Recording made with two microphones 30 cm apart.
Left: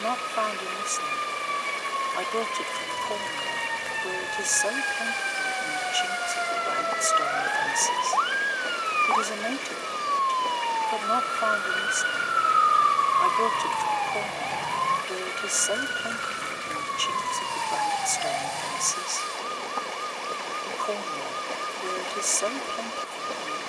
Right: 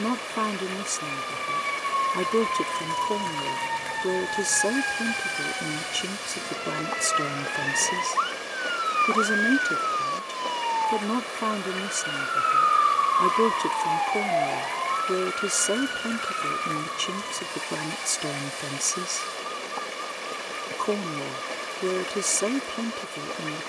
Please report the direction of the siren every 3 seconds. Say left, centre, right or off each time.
right, right, right, centre, left, left, left, left.